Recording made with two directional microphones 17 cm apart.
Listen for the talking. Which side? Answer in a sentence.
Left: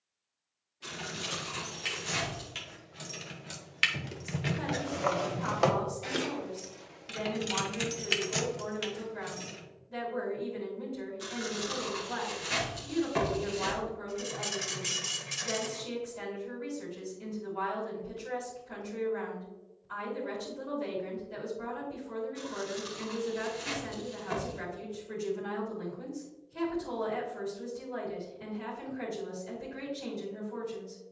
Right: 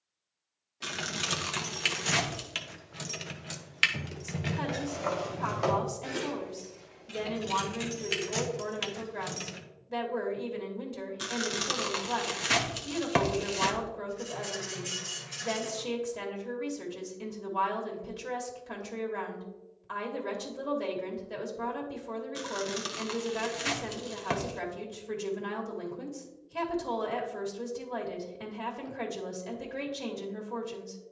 In this clip you hear the talking on the right.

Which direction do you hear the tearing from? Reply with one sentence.
You can hear the tearing on the right.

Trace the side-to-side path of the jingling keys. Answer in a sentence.
In this clip you hear the jingling keys move from right to left and back again.